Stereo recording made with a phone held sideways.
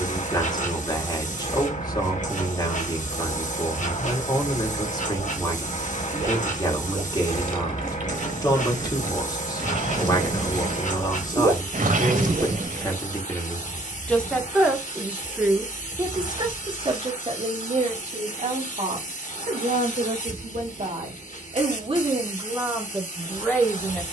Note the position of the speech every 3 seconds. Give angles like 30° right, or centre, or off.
30° left, 30° left, 30° left, 30° left, 20° left, 30° right, 60° right, 20° right.